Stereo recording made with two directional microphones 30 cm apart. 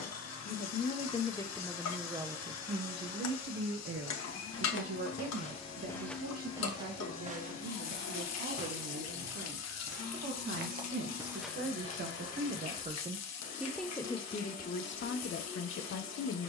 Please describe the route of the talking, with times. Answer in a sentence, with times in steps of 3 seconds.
You can hear the talking in the centre from 0 s, on the right from 3 s, in the centre from 12 s and on the left from 15 s.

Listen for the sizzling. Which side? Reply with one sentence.
In this clip you hear the sizzling on the left.